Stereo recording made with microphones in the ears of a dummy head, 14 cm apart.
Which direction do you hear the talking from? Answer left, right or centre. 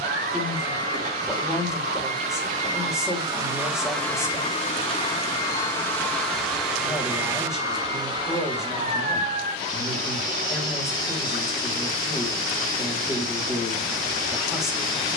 centre.